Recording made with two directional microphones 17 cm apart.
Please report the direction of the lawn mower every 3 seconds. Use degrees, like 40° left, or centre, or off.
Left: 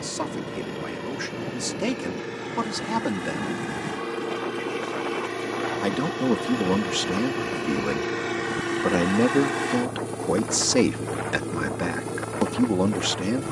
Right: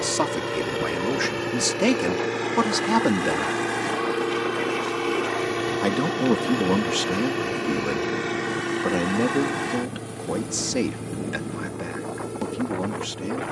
50° right, 30° right, 10° right, 10° left, 20° left.